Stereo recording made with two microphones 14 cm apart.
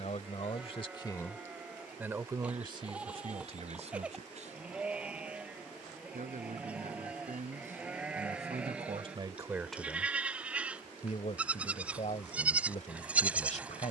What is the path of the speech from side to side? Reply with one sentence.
You can hear the speech move from left to right and back again.